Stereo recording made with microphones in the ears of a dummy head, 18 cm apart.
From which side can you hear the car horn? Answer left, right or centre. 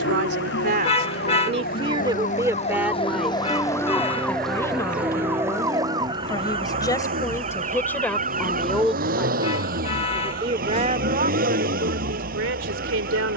left.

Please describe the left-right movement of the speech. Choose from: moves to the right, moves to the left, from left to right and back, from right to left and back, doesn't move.
from right to left and back.